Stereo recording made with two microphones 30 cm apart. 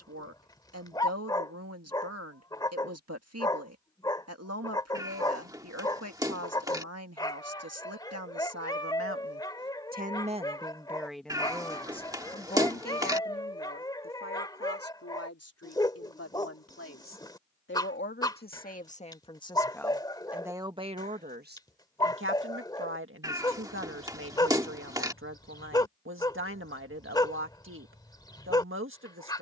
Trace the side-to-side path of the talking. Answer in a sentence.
You can hear the talking go left and come back.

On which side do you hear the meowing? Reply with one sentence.
You can hear the meowing in the centre.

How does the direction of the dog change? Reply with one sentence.
In this clip you hear the dog stay in one place.